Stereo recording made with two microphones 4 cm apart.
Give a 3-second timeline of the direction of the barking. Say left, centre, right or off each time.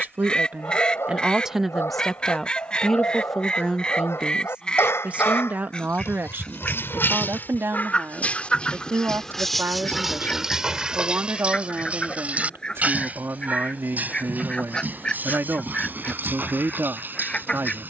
left, left, left, centre, right, right.